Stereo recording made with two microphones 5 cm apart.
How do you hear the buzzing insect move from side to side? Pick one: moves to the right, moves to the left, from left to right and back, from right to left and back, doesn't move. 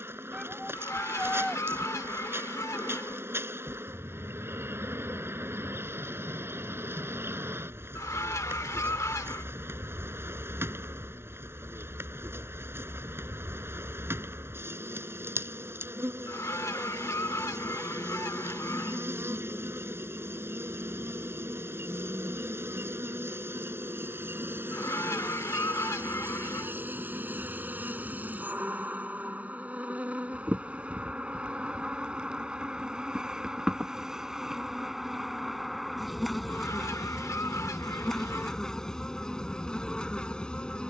moves to the left.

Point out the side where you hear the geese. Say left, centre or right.
left.